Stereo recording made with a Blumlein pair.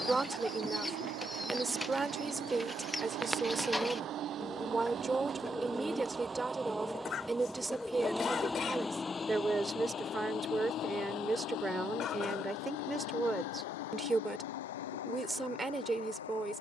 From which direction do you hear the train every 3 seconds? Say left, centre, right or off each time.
right, right, centre, left, left, left.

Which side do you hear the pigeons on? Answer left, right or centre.
centre.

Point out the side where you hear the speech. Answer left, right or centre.
centre.